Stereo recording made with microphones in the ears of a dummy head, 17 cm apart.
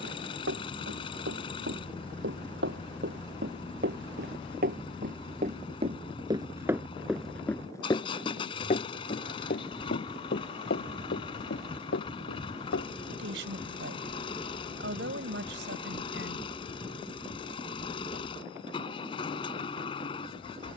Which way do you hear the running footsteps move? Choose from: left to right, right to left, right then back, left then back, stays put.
right to left.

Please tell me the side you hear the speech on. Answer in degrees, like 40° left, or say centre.
70° right.